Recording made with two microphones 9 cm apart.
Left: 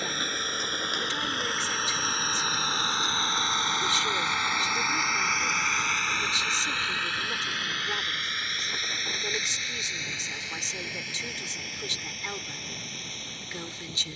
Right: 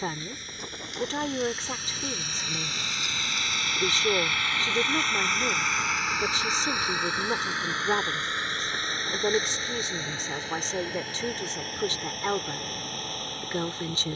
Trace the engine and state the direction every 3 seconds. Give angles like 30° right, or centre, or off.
60° left, 20° left, 20° right, 40° right, 50° right.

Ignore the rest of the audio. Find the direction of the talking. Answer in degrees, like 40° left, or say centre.
40° right.